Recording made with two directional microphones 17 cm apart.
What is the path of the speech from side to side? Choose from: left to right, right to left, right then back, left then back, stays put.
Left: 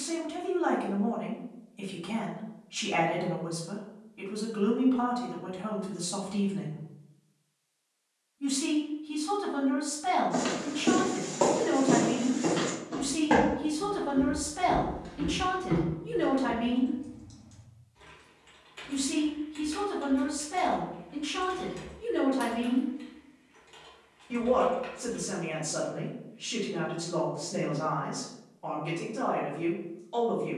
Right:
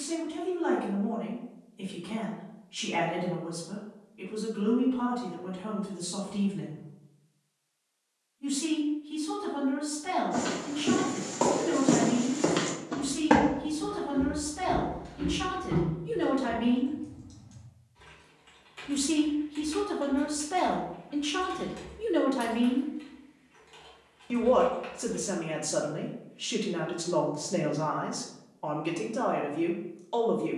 left to right.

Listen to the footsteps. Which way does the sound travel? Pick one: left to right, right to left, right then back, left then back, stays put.
right then back.